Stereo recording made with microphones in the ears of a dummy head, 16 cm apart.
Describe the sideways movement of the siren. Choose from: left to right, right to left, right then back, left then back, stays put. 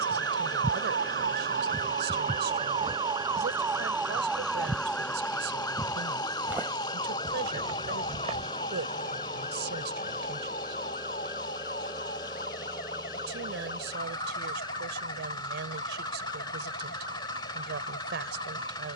right to left.